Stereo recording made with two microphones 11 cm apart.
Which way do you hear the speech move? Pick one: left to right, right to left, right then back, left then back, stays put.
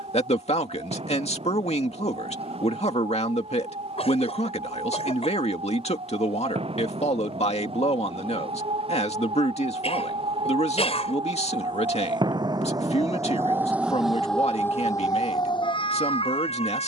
stays put.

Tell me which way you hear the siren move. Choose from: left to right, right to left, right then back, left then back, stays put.
right to left.